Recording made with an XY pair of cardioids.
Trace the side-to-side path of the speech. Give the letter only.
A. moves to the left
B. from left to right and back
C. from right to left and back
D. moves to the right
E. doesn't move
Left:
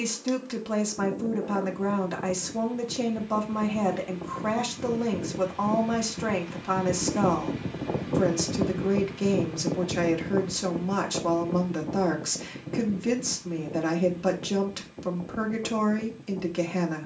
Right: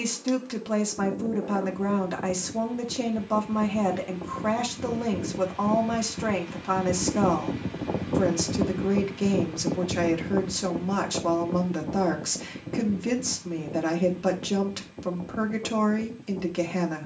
E.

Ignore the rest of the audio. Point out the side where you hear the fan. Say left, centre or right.
centre.